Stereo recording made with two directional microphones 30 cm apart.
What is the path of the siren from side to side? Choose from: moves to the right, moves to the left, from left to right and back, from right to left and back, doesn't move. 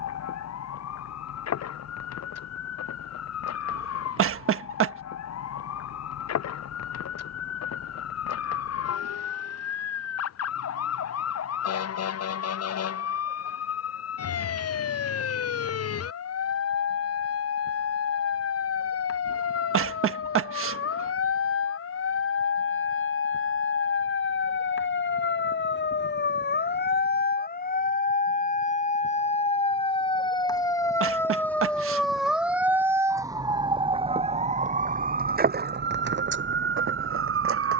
moves to the right.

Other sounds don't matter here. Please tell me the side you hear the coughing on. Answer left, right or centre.
right.